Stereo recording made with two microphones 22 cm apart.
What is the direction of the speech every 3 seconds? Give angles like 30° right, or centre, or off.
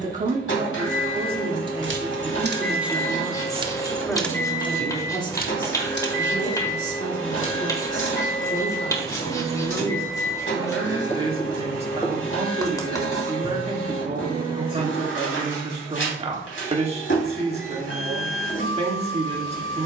20° right, 10° left, 30° left, 10° right, 30° right, 30° right, 30° right.